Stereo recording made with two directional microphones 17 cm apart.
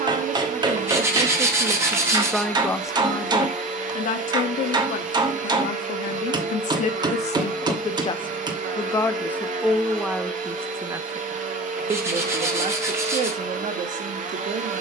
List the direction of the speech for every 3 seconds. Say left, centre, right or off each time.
right, left, left, centre, right.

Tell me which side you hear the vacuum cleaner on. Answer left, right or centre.
right.